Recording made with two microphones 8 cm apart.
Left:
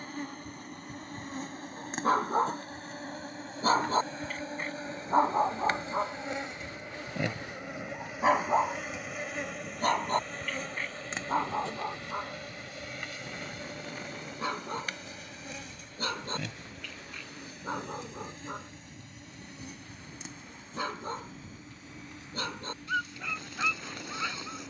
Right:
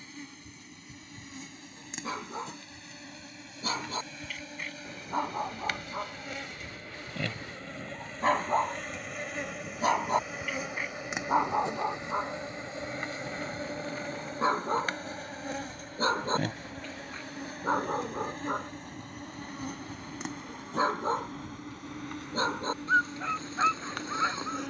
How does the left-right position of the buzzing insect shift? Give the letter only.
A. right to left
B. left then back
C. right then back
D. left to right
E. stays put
D.